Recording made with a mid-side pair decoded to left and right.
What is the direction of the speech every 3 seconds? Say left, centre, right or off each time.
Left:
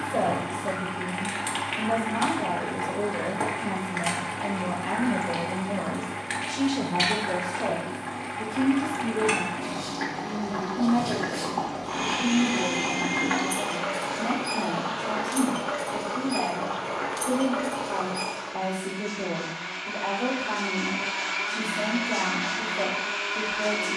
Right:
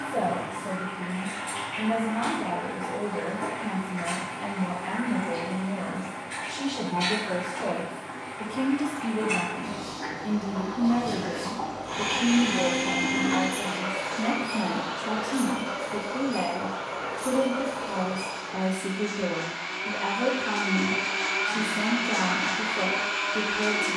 left, left, centre, right, right, right, right, right.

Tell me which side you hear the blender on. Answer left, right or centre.
right.